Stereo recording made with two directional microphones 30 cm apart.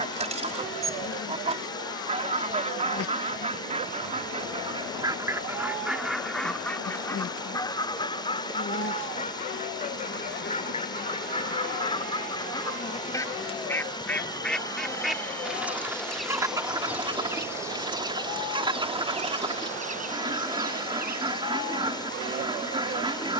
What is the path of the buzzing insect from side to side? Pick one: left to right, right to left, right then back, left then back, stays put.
left to right.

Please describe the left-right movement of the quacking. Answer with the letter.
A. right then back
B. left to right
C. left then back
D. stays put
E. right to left
C.